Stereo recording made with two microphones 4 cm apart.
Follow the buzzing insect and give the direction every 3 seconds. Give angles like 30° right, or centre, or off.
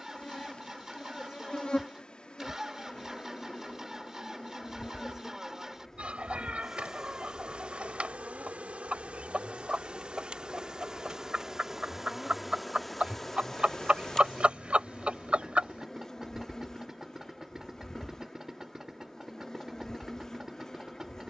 20° left, 20° left, 20° right, 20° right, 10° left, 10° left, 10° left.